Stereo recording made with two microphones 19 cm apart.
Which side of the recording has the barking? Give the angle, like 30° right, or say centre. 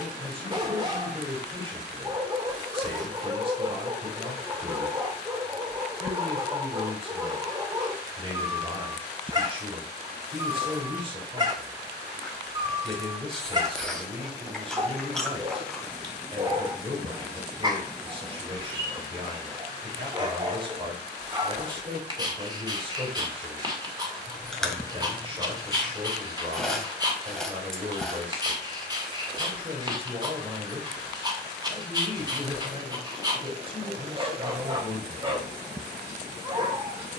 20° right.